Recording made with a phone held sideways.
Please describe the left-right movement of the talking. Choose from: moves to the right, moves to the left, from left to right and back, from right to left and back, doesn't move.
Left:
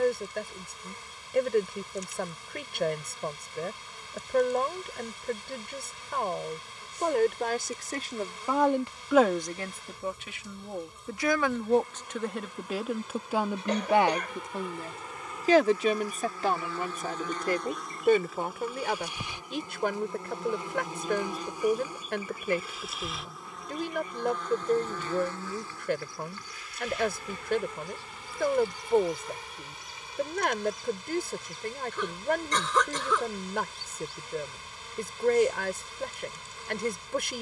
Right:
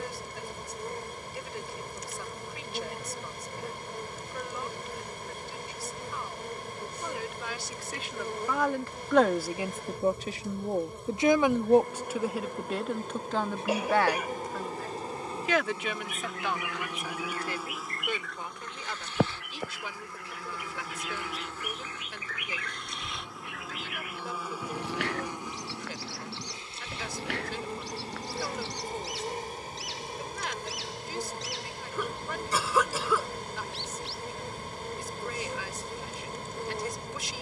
from left to right and back.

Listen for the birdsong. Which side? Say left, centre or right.
right.